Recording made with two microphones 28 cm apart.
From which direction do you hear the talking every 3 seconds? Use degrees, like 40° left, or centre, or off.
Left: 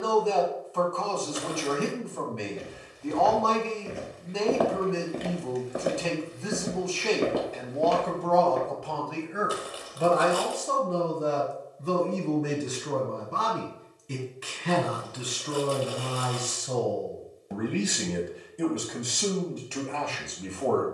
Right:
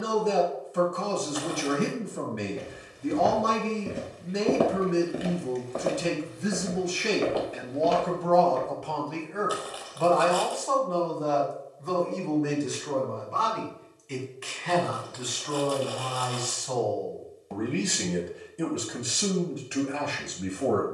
20° right, 20° right, 10° right, 20° left, 40° left, 20° left, 10° right.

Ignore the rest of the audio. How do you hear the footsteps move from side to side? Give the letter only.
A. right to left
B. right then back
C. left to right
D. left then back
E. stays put
A.